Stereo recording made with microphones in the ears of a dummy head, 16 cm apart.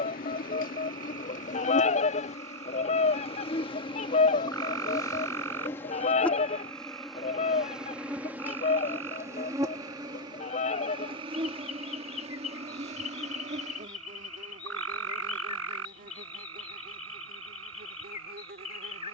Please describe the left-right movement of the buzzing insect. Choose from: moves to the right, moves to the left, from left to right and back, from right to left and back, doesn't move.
moves to the right.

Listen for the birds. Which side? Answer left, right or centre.
left.